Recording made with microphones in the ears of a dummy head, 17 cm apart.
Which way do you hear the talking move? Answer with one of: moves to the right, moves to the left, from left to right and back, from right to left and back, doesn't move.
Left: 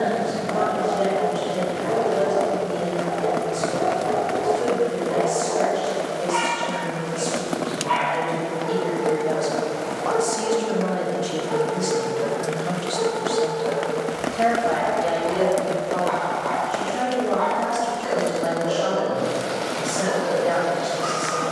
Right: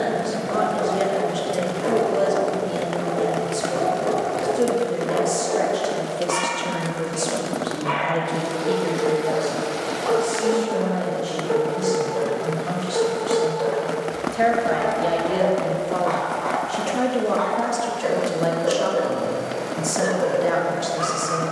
from right to left and back.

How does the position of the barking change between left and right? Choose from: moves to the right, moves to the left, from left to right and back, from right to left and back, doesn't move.
doesn't move.